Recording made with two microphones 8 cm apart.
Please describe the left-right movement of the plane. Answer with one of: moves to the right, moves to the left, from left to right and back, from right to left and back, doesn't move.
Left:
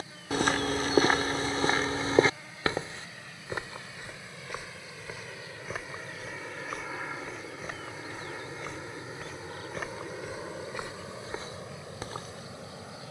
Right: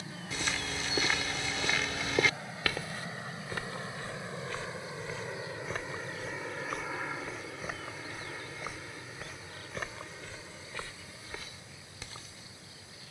moves to the left.